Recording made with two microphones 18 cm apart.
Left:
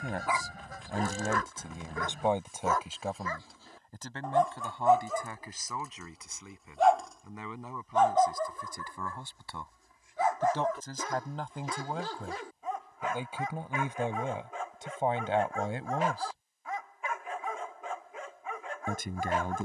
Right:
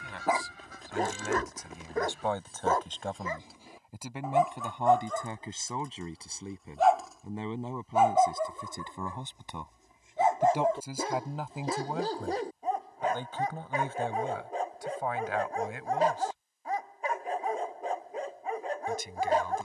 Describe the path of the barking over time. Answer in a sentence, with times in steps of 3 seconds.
In this clip you hear the barking on the right from 0 s, in the centre from 3 s and on the right from 9 s.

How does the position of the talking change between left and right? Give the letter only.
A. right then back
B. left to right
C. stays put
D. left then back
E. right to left
A.